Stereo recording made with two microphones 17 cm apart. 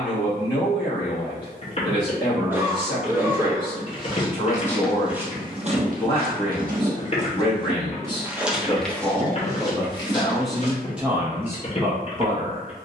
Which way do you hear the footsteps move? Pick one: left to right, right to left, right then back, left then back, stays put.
right then back.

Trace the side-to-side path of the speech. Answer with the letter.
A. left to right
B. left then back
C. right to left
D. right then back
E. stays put
A.